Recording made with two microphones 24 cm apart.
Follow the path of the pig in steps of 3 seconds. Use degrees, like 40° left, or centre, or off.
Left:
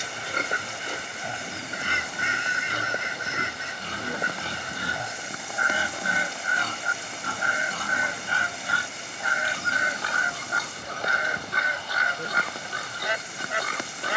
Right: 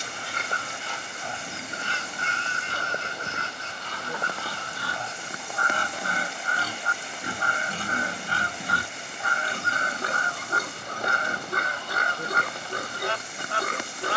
50° left, 20° left, 20° right, 50° right, 50° right.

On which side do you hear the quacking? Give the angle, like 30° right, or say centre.
10° left.